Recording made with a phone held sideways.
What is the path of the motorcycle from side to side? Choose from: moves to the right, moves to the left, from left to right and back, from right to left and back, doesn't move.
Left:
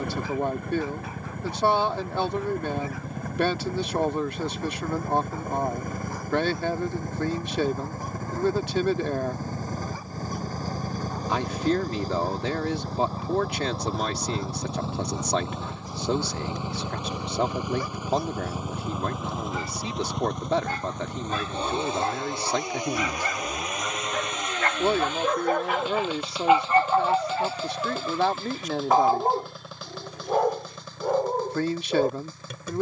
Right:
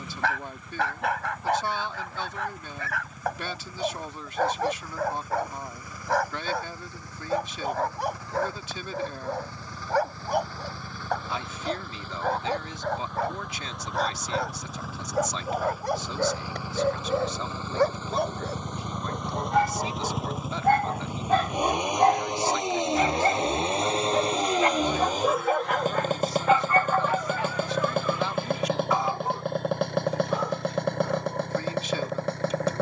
moves to the right.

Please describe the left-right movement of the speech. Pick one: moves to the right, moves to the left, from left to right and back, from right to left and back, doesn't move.
doesn't move.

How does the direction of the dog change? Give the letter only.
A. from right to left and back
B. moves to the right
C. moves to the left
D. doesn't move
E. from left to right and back
C.